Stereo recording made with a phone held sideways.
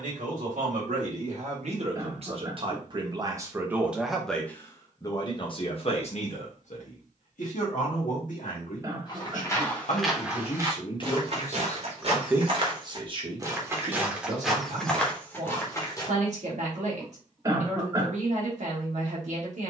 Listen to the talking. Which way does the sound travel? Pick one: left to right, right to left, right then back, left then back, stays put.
left then back.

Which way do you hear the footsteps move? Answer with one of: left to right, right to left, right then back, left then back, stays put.
right then back.